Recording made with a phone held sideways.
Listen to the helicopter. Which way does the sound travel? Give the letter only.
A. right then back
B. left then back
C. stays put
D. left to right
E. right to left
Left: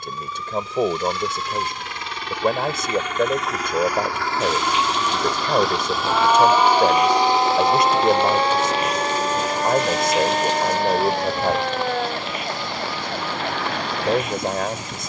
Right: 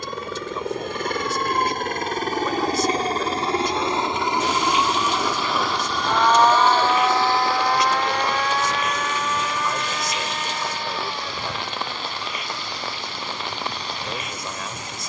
E.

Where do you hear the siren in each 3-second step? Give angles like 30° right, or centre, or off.
40° right, 10° right, 20° left, 50° left, 60° left.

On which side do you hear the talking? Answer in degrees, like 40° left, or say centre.
50° left.